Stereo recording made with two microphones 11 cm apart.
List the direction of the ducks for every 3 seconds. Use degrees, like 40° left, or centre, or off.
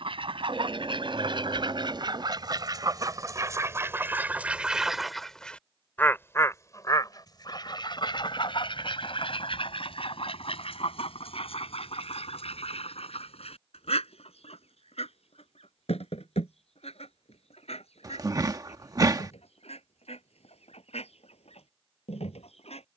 50° right, 20° right, 40° left, 70° left, 70° left, 80° left, 80° left, 80° left.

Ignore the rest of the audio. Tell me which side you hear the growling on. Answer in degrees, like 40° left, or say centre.
40° right.